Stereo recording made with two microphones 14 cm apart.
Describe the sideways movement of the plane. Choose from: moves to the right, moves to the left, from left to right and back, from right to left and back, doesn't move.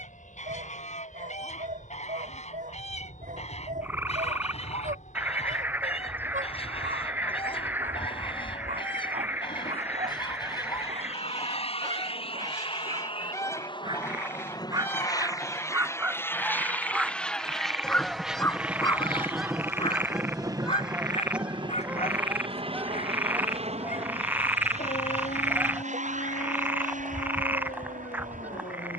moves to the right.